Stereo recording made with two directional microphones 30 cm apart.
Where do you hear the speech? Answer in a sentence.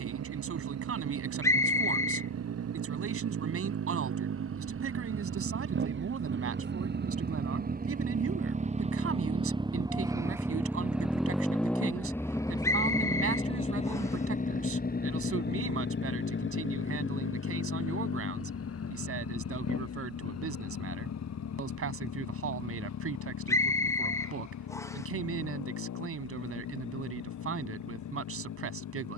You can hear the speech on the right.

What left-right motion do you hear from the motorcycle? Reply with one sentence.
You can hear the motorcycle go from the right side to the left.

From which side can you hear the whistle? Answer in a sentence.
In this clip you hear the whistle in the centre.